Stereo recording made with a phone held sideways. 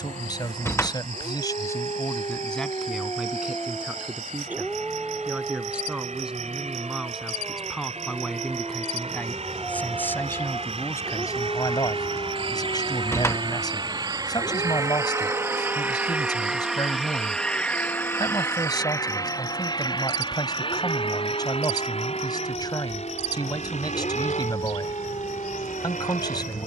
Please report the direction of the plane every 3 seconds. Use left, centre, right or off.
right, right, right, right, right, centre, left, left, left.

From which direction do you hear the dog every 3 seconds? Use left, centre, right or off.
left, centre, centre, left, left, left, left, left, left.